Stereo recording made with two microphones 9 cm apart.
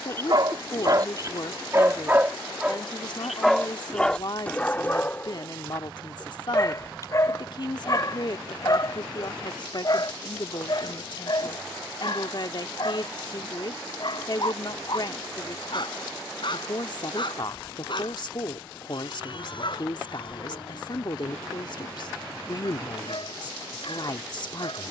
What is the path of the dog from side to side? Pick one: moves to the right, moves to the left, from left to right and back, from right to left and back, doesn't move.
moves to the left.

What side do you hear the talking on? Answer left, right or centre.
left.